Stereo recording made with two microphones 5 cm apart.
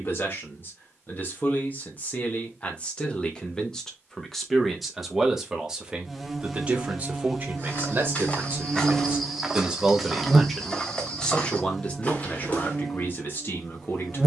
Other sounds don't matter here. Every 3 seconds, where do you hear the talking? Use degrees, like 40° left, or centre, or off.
40° left, centre, 30° right, centre, 40° left.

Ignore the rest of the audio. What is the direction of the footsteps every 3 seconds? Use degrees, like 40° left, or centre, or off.
off, off, 30° left, 10° left, 30° left.